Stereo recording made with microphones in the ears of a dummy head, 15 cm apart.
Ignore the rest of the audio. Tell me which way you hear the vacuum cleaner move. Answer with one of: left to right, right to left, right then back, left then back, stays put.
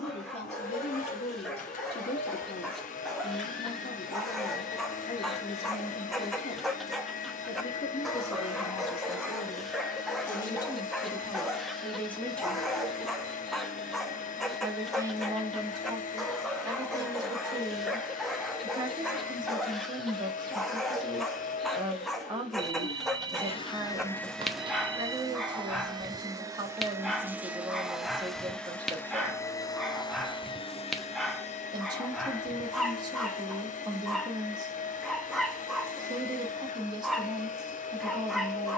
right then back.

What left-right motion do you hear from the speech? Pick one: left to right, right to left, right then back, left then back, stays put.
left to right.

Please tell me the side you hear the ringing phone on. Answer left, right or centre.
right.